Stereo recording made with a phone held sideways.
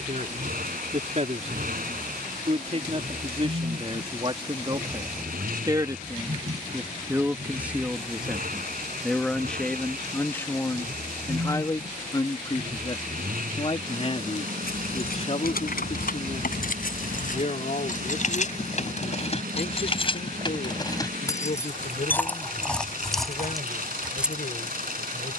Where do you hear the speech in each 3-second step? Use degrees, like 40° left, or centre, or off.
50° right, 30° right, 10° right, 10° left, 40° left, 50° left, 60° left, 60° left, 70° left.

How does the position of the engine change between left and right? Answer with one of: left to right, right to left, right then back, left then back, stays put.
stays put.